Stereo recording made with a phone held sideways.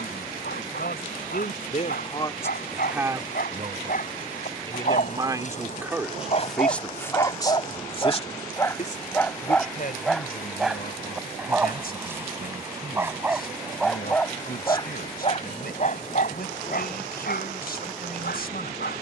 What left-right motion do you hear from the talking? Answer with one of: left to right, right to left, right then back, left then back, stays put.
right then back.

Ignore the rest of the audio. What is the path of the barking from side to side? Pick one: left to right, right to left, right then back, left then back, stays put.
right then back.